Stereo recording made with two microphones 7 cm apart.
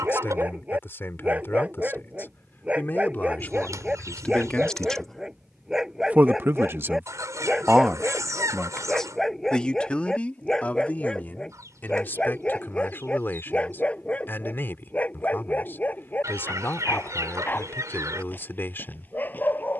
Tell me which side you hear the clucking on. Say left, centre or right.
right.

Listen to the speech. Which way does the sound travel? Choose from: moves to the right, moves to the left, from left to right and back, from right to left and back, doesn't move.
from left to right and back.